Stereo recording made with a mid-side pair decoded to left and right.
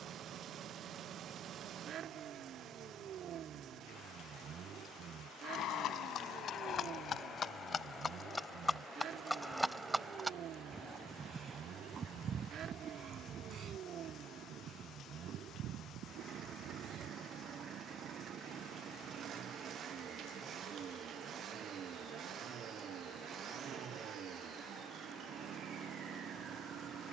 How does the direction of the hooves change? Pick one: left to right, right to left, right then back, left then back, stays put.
left to right.